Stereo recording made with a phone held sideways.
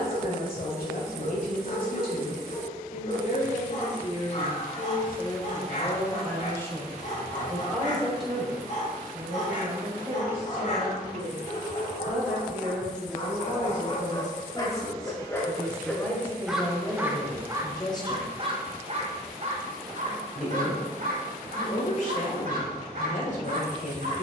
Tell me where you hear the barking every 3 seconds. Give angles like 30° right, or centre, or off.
50° left, 50° left, 50° left, 50° left, 30° left, centre, 40° right, 60° right.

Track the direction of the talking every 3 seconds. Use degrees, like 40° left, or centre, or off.
60° left, 40° left, 10° left, 10° right, 10° right, 10° left, 40° left, 50° left.